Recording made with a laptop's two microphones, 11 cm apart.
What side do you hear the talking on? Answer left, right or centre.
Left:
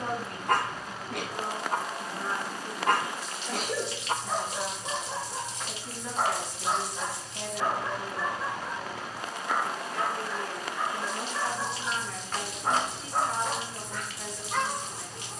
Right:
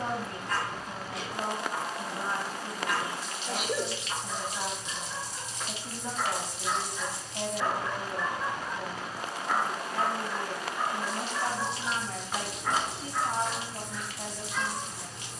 right.